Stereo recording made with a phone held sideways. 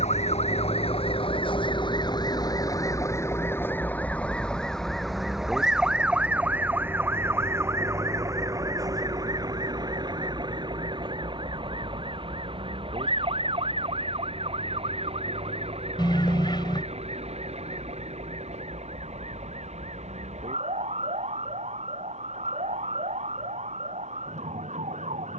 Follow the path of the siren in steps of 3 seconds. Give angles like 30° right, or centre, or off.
40° left, 10° left, 20° right, 30° right, 40° right, 40° right, 50° right, 50° right, 50° right.